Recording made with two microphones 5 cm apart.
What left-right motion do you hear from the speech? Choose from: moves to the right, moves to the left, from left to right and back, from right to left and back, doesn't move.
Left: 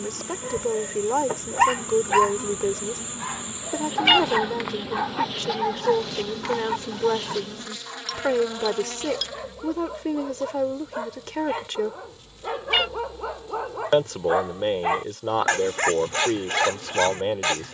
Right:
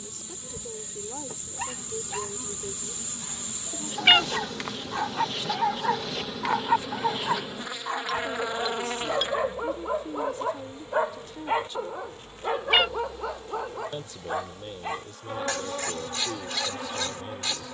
doesn't move.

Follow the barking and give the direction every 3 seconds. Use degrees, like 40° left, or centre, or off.
60° left, 20° left, 30° right, 30° right, 10° left, 50° left.